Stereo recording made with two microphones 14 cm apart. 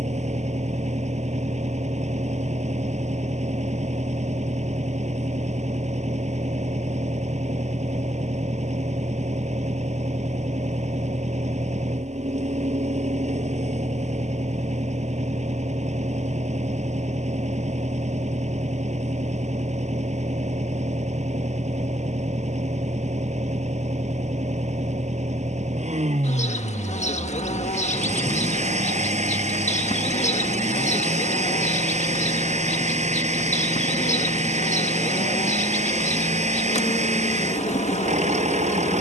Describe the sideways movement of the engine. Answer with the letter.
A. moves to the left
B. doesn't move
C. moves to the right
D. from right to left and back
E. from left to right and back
B.